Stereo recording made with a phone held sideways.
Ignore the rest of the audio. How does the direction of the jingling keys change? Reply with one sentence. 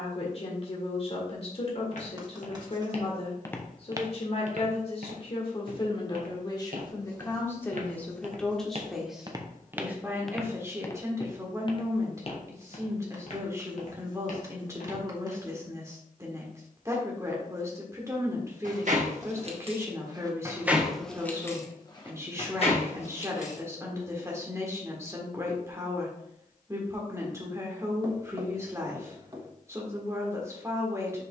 You can hear the jingling keys travel towards the left.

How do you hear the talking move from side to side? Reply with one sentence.
In this clip you hear the talking move from left to right.